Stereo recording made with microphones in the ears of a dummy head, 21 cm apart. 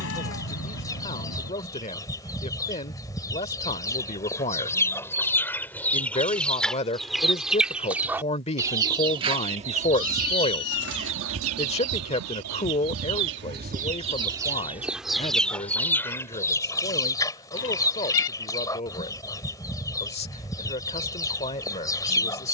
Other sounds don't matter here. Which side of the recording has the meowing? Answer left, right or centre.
left.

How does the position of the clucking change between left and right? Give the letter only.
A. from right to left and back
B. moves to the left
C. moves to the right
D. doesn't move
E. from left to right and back
E.